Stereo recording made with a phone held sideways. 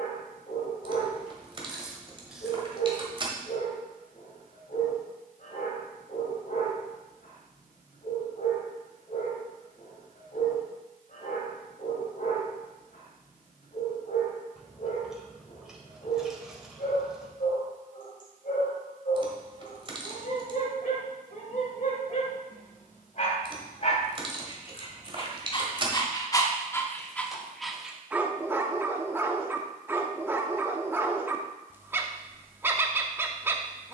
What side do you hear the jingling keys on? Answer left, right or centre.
right.